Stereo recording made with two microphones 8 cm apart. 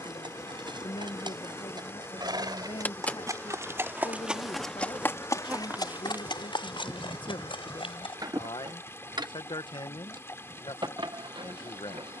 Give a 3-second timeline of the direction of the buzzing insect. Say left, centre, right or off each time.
left, centre, right, right.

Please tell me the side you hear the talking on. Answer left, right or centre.
left.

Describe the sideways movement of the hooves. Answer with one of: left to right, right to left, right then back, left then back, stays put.
right to left.